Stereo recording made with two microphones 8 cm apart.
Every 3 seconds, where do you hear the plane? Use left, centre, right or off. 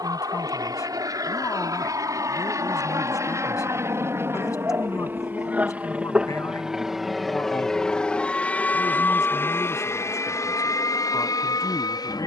right, right, centre, left.